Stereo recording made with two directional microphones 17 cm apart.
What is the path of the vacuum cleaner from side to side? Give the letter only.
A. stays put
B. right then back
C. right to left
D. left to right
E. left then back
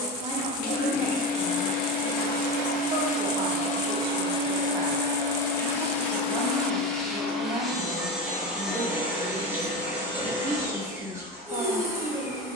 D.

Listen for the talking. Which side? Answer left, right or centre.
right.